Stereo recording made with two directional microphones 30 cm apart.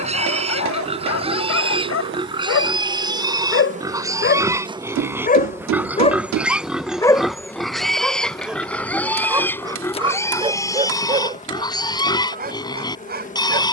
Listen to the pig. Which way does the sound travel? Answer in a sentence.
In this clip you hear the pig travel towards the left.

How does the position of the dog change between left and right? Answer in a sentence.
In this clip you hear the dog move to the right.